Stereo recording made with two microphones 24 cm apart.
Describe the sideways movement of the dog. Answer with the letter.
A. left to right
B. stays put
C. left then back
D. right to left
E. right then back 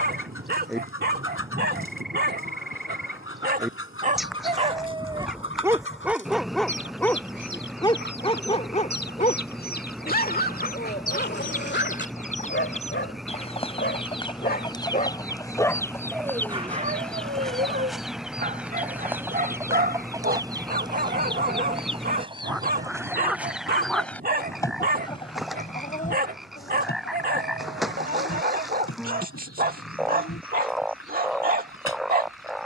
C.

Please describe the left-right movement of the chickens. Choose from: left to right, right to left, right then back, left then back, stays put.
right then back.